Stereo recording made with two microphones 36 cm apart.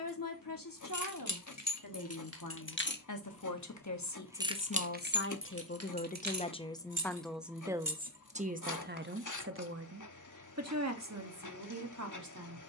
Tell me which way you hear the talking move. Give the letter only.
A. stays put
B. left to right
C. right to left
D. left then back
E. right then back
B.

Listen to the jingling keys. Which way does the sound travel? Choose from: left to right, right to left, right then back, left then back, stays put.
left to right.